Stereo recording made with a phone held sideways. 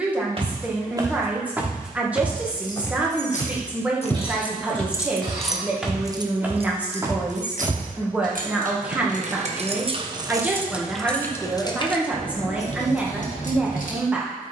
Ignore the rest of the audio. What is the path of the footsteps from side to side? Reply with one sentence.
You can hear the footsteps move from right to left and back again.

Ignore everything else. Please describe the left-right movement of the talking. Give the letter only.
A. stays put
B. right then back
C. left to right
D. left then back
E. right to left
A.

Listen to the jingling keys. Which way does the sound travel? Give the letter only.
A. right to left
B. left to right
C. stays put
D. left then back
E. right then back
E.